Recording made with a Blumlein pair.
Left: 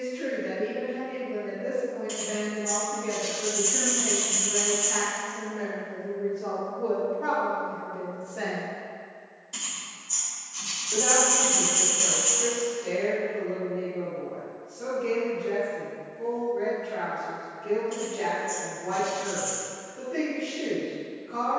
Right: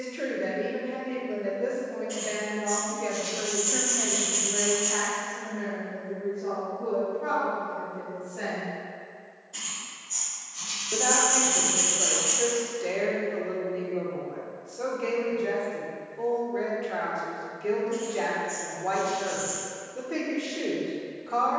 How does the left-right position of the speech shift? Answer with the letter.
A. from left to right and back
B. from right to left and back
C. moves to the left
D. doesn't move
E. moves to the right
B.